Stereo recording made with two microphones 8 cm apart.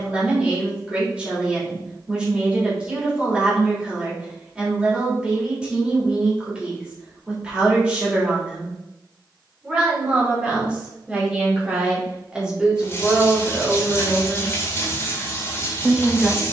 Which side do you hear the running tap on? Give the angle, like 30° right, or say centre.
30° left.